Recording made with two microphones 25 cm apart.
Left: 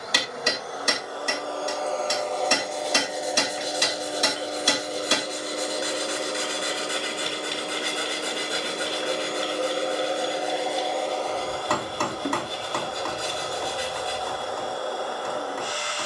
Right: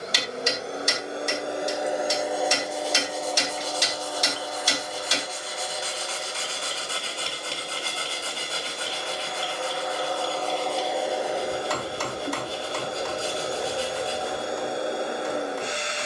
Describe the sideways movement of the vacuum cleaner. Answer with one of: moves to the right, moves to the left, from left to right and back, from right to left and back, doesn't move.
from right to left and back.